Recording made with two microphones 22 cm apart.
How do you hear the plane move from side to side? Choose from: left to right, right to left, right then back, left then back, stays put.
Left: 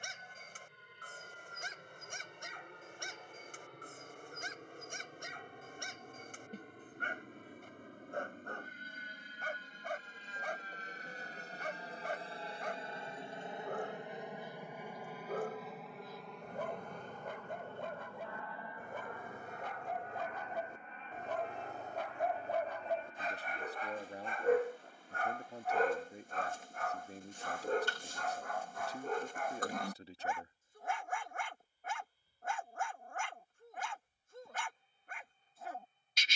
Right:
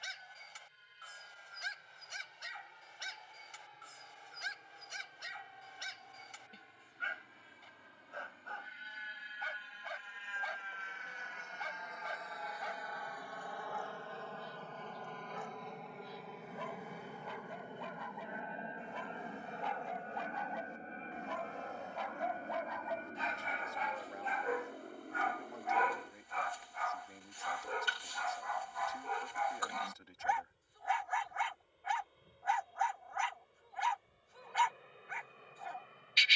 left to right.